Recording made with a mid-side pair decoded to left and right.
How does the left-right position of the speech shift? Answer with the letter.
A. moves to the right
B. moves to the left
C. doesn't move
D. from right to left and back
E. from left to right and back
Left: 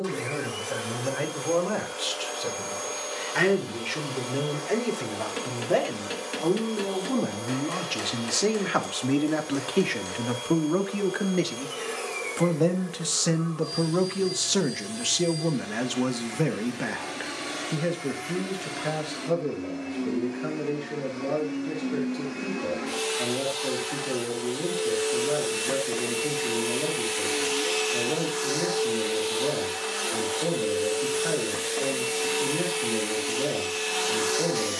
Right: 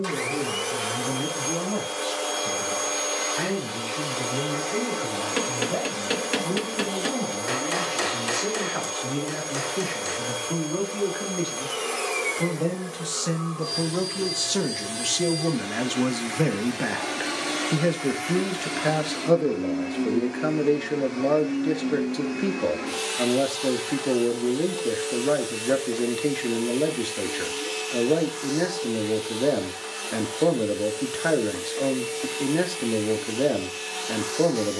A.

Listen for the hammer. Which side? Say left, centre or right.
right.